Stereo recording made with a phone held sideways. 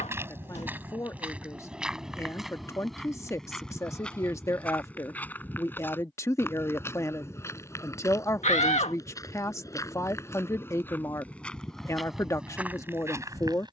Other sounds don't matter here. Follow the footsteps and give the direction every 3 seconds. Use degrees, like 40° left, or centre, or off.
10° right, 10° left, 20° left, 20° left, 20° right.